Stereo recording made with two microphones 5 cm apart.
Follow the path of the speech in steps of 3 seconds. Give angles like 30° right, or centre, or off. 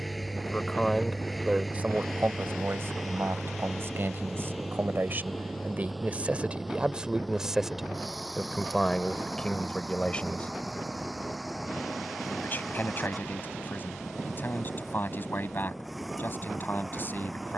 30° right, 50° right, 10° right, 20° left, 40° left, 50° left.